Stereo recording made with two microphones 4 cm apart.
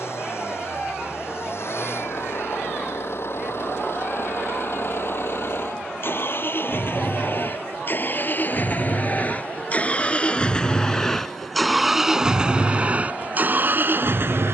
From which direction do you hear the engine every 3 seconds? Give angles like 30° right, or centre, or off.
60° left, 60° left, 50° left, 20° left, 30° right.